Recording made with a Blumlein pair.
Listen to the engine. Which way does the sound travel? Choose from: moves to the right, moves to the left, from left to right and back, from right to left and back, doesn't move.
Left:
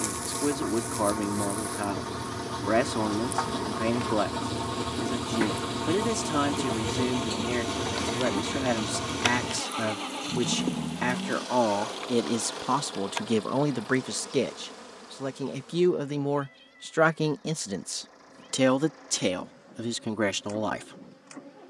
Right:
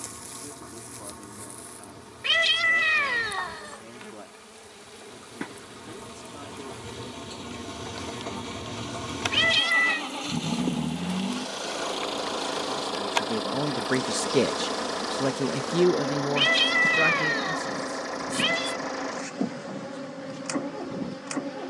moves to the right.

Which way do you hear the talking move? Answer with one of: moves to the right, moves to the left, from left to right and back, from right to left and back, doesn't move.
from left to right and back.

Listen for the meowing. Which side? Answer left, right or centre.
right.